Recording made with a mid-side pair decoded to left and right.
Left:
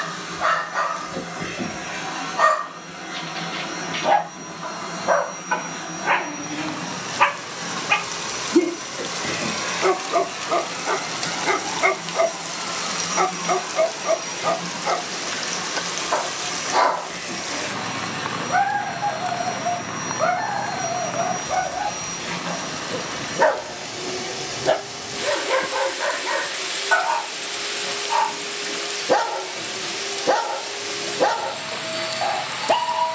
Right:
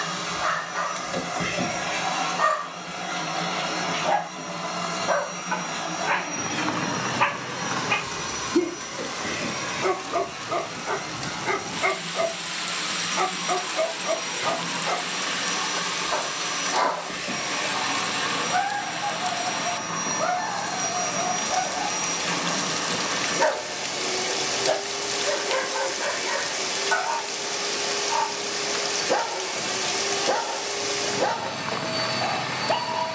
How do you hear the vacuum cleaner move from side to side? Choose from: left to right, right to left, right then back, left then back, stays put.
left then back.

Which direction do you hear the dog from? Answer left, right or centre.
left.